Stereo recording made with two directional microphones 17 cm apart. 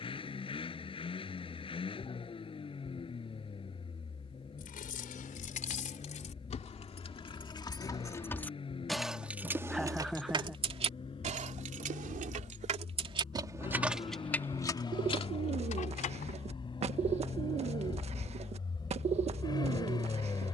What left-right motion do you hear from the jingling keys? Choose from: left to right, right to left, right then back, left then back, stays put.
right then back.